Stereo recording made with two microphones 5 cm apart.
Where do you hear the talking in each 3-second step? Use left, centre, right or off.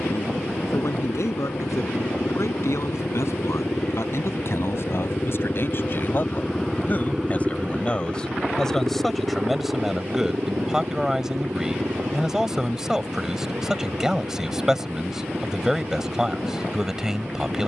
left, left, left, centre, centre, centre.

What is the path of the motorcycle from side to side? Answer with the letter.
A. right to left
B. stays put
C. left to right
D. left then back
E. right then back
C.